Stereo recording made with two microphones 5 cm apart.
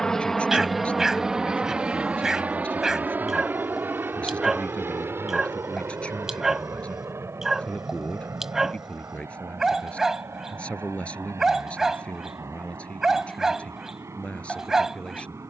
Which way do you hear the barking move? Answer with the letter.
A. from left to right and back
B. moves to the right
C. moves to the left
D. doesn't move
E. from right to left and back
D.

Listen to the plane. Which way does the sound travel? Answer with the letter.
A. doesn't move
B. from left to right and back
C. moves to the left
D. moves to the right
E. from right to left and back
D.